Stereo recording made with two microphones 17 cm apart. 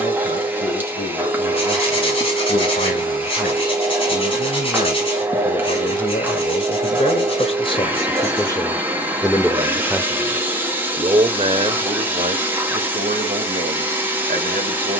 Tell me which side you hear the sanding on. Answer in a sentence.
In this clip you hear the sanding on the left.